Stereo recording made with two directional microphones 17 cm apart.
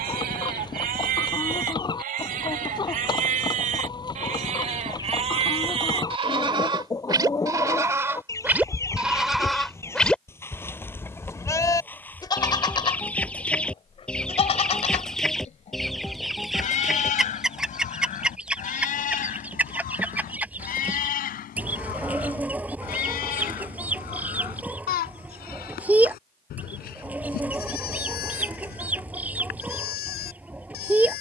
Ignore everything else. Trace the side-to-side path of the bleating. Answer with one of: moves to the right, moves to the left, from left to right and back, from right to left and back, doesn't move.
moves to the left.